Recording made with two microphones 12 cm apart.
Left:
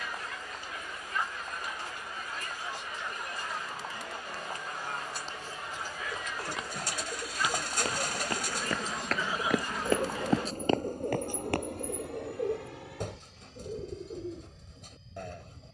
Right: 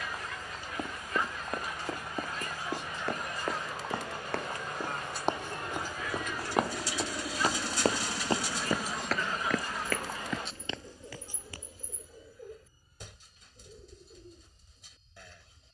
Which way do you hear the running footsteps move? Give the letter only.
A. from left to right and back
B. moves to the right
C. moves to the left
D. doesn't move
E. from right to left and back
C.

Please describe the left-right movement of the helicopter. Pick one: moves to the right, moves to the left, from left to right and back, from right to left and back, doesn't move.
moves to the left.